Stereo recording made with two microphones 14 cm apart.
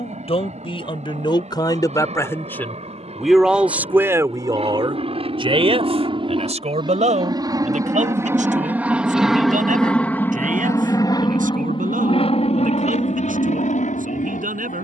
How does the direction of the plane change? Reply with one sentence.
You can hear the plane move to the left.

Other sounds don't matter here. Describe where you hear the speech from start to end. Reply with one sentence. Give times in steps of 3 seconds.
In this clip you hear the speech on the left from 0 s and on the right from 3 s.